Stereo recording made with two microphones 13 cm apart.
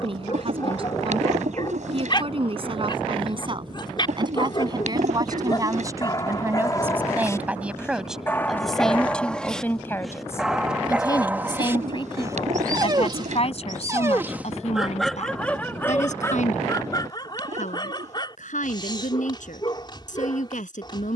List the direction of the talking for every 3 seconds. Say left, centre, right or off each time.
right, right, centre, left, left, left, left.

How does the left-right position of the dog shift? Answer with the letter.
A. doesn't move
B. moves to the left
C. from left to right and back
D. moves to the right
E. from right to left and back
C.